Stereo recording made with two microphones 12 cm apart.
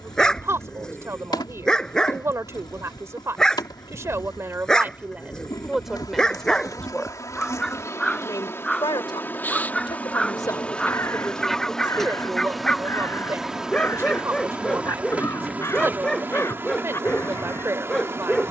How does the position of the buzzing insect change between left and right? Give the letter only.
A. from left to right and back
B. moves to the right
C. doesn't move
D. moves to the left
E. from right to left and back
B.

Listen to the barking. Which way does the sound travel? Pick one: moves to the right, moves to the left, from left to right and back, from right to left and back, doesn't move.
doesn't move.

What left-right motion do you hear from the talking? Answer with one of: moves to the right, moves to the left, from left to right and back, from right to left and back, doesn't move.
from right to left and back.